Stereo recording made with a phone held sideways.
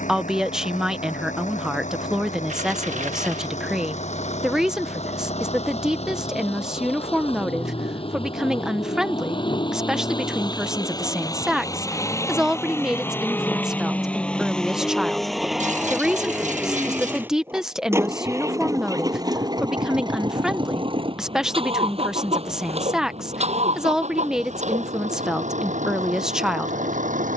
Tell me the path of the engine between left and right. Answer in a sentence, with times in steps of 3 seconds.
In this clip you hear the engine on the left from 0 s, in the centre from 12 s and on the right from 18 s.